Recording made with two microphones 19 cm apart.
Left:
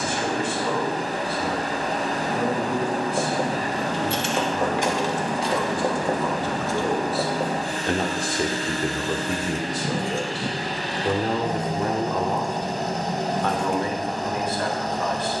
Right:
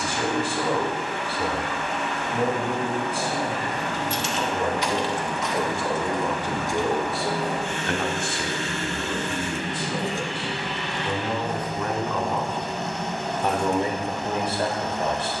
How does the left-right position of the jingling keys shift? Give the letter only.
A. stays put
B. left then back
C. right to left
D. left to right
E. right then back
E.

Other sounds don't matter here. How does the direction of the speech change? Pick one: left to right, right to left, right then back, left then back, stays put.
left then back.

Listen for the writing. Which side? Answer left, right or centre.
left.